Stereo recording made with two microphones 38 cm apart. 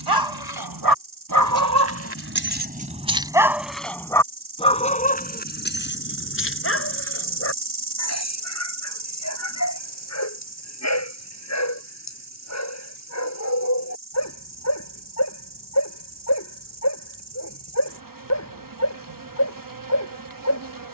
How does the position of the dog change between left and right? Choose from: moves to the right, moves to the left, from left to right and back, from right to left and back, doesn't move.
moves to the left.